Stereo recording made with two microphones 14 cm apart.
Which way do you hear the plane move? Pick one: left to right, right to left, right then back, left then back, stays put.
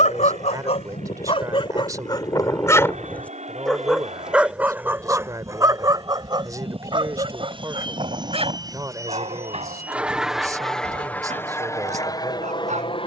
right to left.